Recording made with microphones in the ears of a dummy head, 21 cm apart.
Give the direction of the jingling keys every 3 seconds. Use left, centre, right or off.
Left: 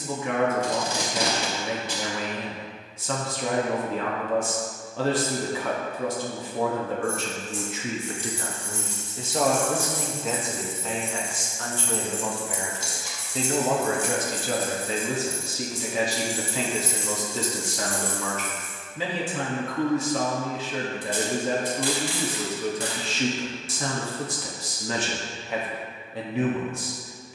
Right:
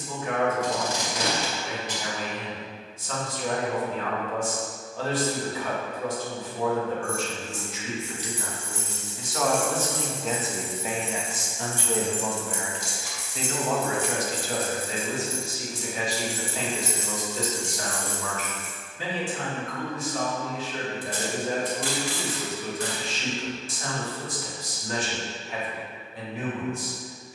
off, off, left, centre, right, right, left, off, off.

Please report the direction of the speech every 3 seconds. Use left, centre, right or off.
left, left, left, centre, left, left, left, left, left.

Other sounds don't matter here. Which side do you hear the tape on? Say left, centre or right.
left.